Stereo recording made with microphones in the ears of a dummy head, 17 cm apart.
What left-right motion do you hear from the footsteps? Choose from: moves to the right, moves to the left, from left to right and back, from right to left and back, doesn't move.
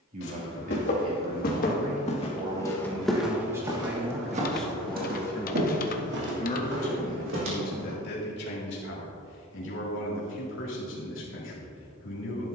moves to the right.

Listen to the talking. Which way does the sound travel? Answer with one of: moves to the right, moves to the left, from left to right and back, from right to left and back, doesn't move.
moves to the left.